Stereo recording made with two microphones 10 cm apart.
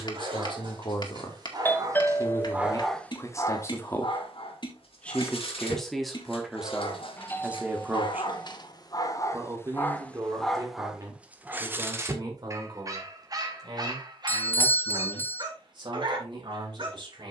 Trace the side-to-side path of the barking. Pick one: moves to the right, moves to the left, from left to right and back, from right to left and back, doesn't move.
from right to left and back.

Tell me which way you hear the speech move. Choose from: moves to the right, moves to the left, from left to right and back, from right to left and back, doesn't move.
moves to the right.